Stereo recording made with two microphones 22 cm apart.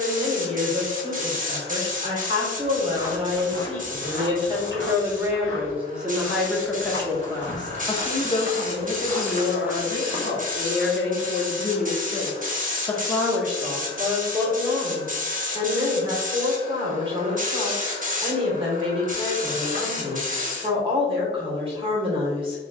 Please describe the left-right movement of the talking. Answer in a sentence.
You can hear the talking move from right to left and back again.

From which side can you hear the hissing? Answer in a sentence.
You can hear the hissing on the right.